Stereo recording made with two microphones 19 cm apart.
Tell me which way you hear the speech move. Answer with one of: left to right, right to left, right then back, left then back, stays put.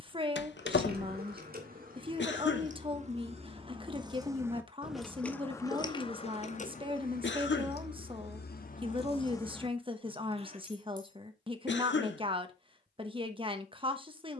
stays put.